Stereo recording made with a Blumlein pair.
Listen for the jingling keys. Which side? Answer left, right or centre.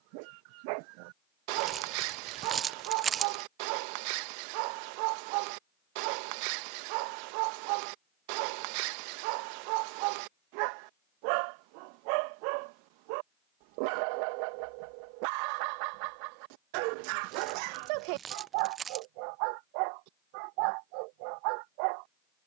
right.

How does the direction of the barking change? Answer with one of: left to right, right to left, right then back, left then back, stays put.
stays put.